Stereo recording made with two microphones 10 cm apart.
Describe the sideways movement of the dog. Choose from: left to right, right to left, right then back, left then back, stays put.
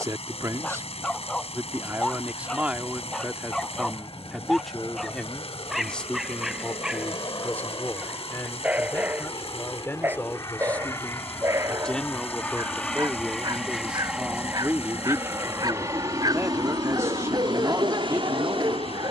left to right.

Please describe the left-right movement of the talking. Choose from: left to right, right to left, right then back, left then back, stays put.
left then back.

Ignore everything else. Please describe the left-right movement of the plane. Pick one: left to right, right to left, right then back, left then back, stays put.
left to right.